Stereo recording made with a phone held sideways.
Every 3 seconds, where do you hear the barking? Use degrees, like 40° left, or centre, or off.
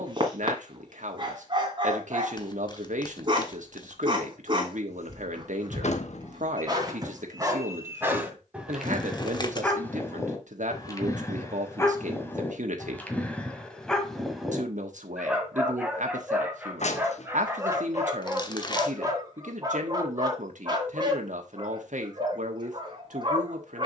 40° right, 40° right, 20° right, 20° left, 10° left, 10° right, 30° right, 40° right.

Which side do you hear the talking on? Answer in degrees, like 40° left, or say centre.
70° right.